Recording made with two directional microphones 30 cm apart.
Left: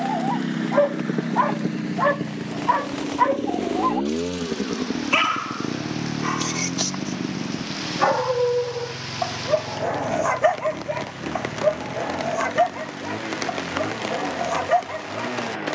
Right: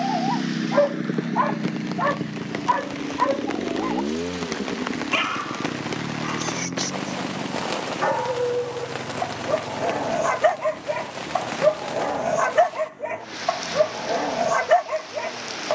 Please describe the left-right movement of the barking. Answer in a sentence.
In this clip you hear the barking move from right to left and back again.